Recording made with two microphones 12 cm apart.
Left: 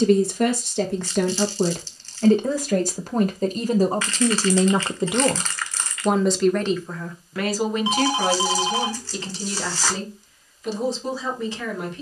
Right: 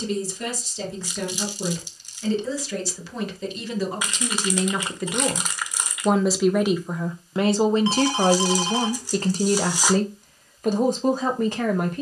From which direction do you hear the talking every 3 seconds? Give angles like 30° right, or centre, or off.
60° left, 30° left, 20° right, 50° right.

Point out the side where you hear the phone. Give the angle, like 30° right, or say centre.
10° left.